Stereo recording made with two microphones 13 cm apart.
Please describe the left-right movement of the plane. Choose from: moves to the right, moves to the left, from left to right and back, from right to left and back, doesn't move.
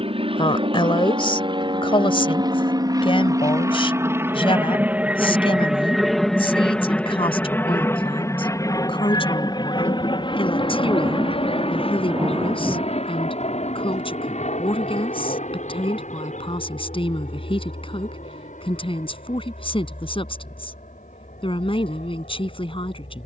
moves to the left.